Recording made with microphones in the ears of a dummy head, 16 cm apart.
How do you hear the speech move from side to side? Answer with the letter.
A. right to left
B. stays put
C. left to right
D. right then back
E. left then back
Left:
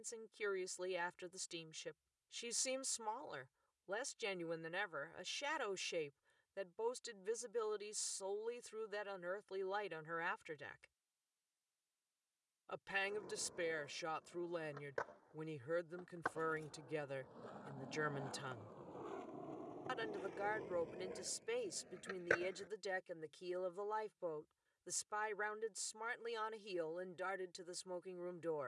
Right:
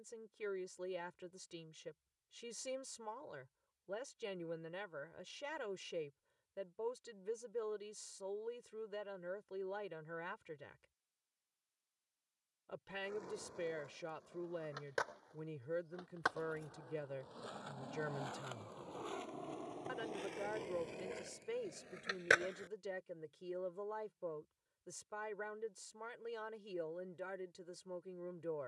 B.